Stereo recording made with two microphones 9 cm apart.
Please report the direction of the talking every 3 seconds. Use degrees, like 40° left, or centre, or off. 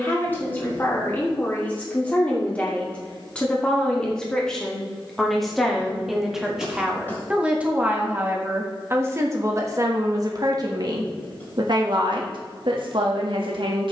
20° left, 10° left, 10° right, 40° right, 70° right.